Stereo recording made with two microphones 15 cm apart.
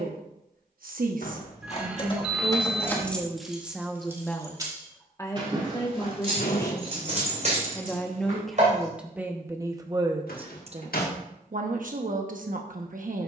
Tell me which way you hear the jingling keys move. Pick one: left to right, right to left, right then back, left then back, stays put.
left to right.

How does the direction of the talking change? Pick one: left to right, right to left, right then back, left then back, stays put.
left then back.